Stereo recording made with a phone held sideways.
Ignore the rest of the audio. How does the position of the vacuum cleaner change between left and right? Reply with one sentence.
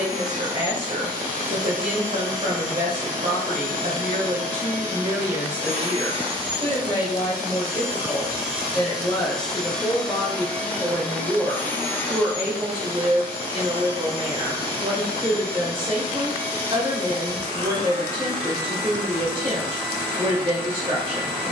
In this clip you hear the vacuum cleaner move to the left.